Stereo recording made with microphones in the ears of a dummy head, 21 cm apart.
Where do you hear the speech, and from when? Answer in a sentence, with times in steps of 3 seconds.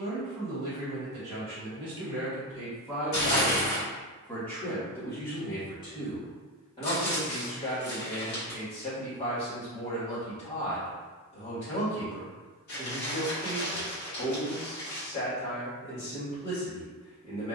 You can hear the speech on the right from 0 s, in the centre from 3 s and on the left from 6 s.